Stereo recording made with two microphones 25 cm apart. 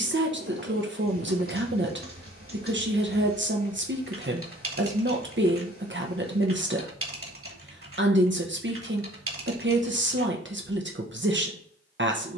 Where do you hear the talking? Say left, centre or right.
right.